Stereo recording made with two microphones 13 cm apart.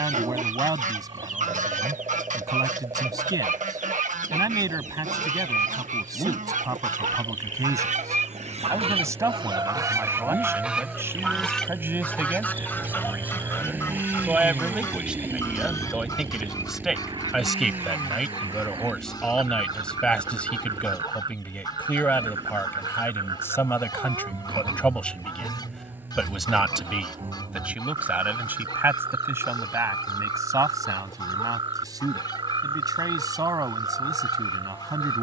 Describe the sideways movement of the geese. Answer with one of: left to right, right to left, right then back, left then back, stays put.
right to left.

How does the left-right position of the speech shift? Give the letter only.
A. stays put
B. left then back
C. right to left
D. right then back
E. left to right
B.